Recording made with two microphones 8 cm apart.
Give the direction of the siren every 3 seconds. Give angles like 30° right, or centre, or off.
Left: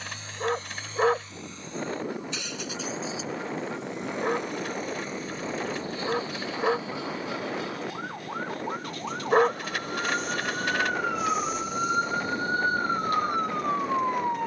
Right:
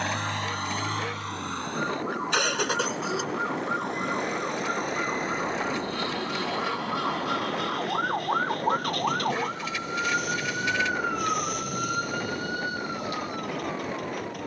60° right, 60° right, 40° right, 10° right, 40° left.